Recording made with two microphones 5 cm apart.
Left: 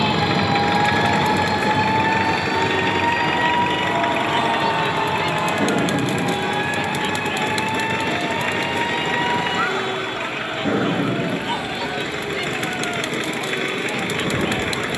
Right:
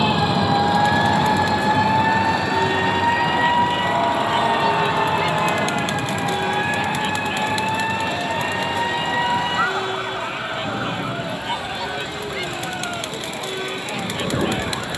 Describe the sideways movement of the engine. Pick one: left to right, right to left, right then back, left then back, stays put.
stays put.